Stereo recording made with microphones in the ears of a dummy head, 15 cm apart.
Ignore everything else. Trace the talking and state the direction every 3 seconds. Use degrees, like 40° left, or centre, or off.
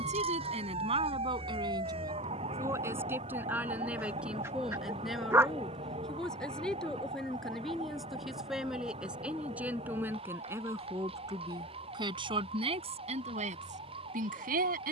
30° right, centre, centre, 10° right, 40° right.